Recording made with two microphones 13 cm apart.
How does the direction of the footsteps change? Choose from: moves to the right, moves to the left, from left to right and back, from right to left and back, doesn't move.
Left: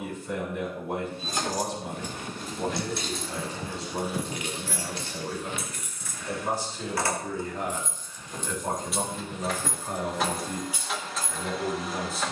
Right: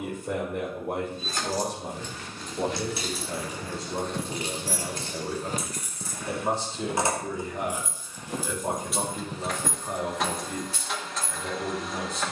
from left to right and back.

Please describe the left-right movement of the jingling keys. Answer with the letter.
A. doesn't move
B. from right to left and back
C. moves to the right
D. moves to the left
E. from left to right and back
E.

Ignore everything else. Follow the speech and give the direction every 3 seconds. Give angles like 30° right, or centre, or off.
60° right, 40° right, 20° right, centre.